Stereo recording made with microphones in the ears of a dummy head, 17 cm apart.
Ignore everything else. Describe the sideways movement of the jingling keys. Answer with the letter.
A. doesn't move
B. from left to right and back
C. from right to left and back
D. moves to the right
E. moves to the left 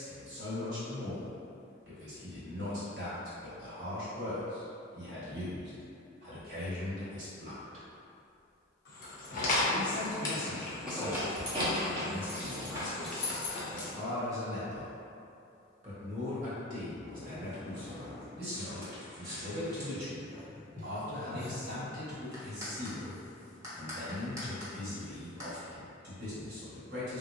B.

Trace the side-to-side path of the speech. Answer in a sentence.
In this clip you hear the speech move from right to left and back again.